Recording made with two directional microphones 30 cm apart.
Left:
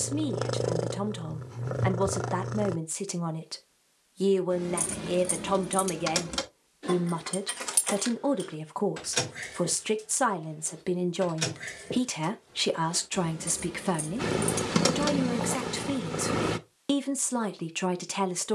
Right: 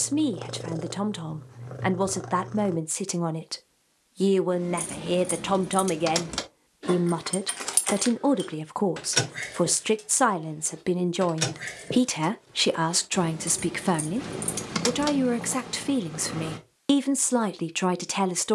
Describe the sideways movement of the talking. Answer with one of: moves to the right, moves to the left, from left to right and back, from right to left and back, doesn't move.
doesn't move.